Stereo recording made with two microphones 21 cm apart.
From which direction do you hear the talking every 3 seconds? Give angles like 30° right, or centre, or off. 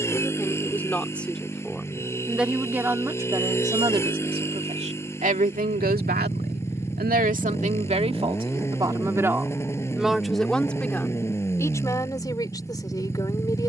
centre, 30° right, 40° right, centre, 20° left.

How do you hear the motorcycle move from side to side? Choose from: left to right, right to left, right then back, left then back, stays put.
stays put.